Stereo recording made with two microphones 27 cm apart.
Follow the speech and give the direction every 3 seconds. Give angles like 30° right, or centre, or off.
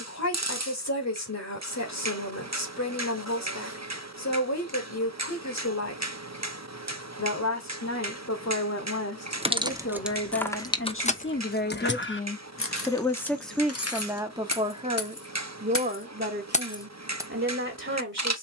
80° left, 80° left, 70° left, 50° left, centre, 40° right.